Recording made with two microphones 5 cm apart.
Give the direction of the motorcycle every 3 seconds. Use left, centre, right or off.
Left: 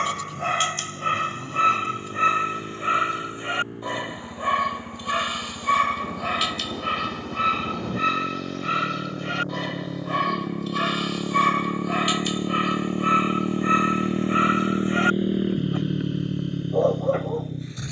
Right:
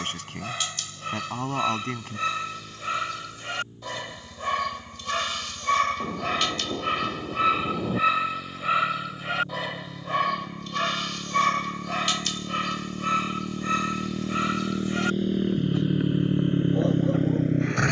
left, left, left, left, left, right.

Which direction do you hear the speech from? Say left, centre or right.
right.